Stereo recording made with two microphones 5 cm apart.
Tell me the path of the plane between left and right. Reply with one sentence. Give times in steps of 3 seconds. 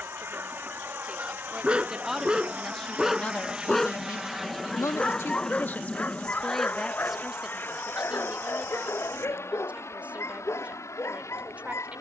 In this clip you hear the plane on the right from 0 s, in the centre from 3 s and on the left from 6 s.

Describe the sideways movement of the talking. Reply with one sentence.
You can hear the talking go left and come back.